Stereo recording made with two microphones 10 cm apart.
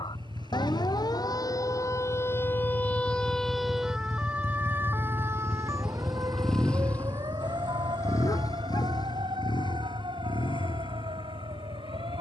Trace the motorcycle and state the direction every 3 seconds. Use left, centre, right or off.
right, right, left, left.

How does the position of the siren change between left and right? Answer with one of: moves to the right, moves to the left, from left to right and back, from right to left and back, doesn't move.
moves to the right.